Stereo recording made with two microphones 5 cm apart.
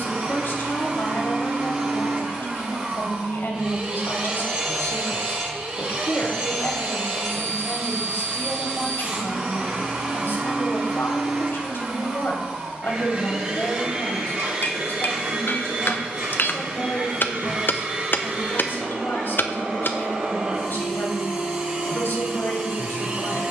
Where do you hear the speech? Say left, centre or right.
left.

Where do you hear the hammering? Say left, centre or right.
left.